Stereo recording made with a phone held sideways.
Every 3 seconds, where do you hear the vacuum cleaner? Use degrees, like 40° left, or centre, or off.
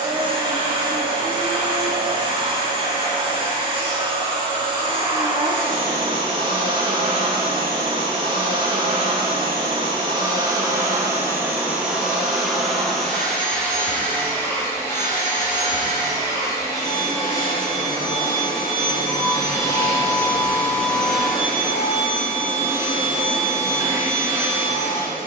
30° right, 30° right, 30° right, 20° right, 10° left, 20° left, 20° left, 10° right, 20° right.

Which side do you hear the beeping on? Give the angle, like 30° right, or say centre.
20° left.